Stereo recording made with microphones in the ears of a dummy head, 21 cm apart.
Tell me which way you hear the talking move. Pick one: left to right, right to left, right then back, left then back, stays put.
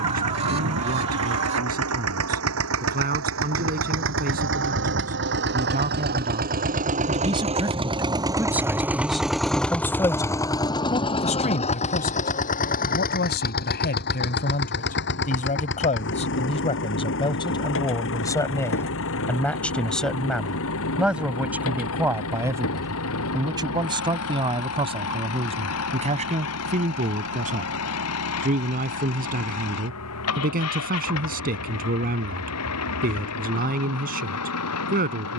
left then back.